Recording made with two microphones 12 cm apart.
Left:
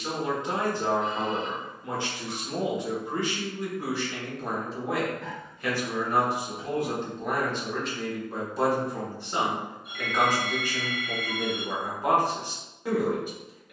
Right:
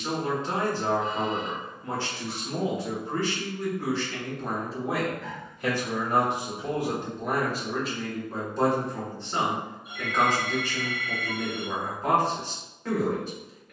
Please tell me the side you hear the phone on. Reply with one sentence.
In this clip you hear the phone on the left.